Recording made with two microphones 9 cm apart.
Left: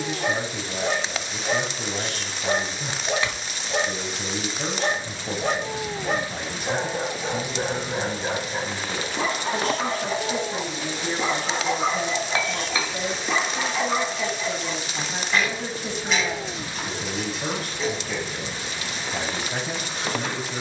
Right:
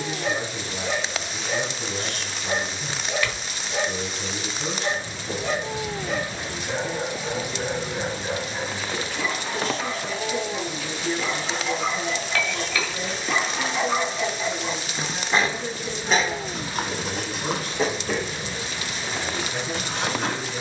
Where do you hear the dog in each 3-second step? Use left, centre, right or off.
left, left, left, left, centre, right, right.